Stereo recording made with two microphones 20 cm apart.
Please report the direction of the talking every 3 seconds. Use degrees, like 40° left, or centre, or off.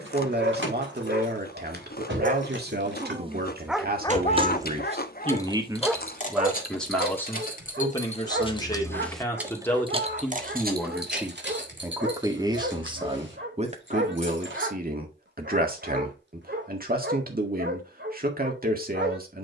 60° right, 40° right, 10° left, centre, 30° right, 50° right, 50° right.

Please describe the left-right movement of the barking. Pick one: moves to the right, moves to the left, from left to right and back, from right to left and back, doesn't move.
from right to left and back.